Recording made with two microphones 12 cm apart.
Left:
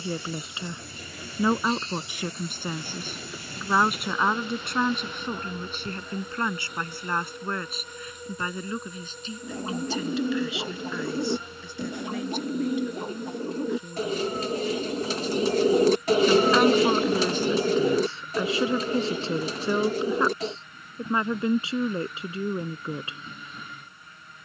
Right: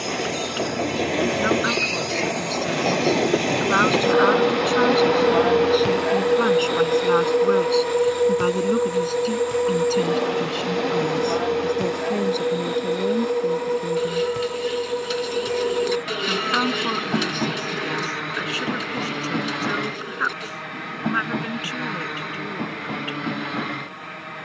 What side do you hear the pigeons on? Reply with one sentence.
You can hear the pigeons on the left.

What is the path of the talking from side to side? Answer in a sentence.
In this clip you hear the talking go right and come back.